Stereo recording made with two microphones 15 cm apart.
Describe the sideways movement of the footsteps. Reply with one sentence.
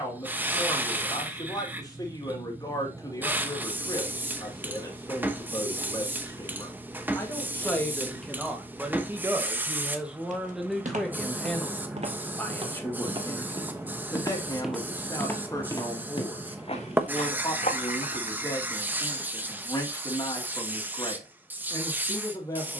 You can hear the footsteps move to the left.